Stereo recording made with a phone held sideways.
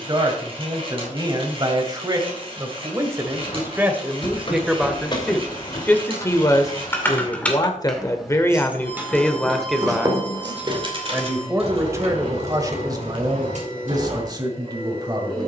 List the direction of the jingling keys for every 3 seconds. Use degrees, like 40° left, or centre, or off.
off, 40° left, 10° left, 30° right, 60° right.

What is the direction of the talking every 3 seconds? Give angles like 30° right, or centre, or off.
30° right, 10° right, 20° left, 10° right, 30° right.